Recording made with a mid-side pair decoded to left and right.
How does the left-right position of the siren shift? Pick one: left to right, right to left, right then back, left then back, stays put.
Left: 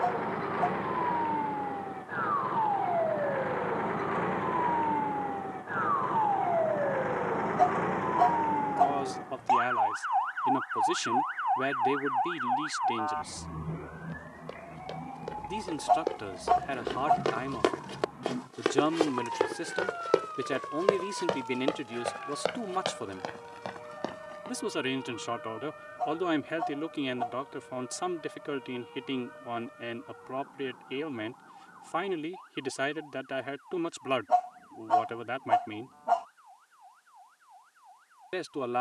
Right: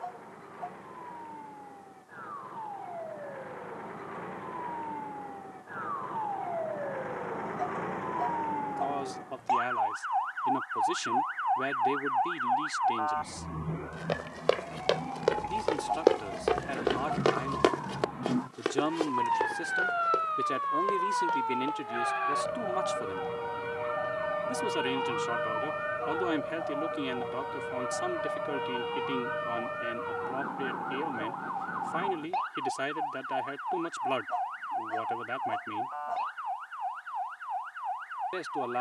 left to right.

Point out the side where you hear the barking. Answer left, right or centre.
left.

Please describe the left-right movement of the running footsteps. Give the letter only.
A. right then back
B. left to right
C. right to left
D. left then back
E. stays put
C.